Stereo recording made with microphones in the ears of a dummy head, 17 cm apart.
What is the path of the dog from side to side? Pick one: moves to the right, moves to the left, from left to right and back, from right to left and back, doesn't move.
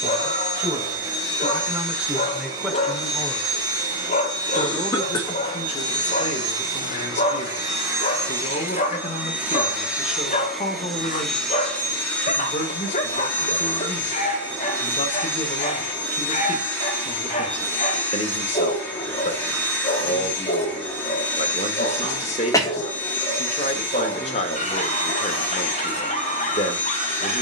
doesn't move.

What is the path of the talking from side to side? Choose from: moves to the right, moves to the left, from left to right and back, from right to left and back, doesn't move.
moves to the left.